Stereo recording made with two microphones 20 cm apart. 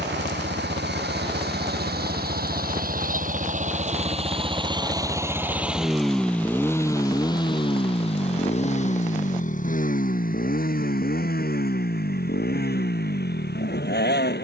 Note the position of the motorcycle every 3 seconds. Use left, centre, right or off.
right, right, left, left, left.